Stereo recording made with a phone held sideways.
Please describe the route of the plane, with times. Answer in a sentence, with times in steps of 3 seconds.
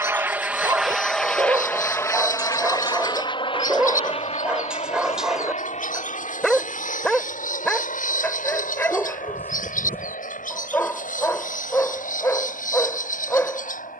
In this clip you hear the plane in the centre from 0 s and on the left from 3 s.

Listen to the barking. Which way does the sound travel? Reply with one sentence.
In this clip you hear the barking move from right to left.